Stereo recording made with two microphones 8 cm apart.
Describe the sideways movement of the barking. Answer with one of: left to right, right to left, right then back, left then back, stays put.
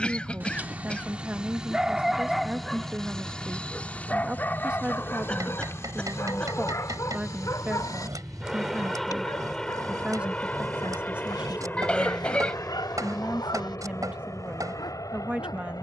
right to left.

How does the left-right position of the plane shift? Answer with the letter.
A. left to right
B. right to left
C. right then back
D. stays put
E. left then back
B.